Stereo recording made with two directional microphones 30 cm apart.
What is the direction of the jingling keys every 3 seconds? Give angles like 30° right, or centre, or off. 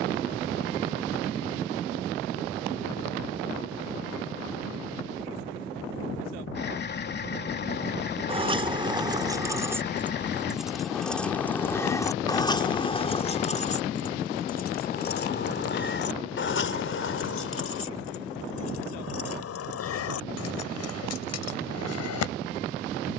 off, off, 20° right, centre, 20° left, 40° left, 60° left, 60° left.